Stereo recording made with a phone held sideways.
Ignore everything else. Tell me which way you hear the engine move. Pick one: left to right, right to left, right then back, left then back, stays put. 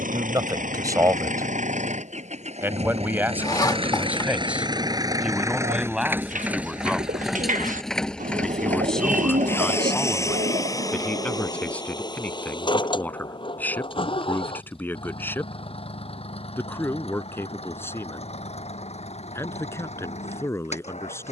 right to left.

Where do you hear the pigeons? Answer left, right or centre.
right.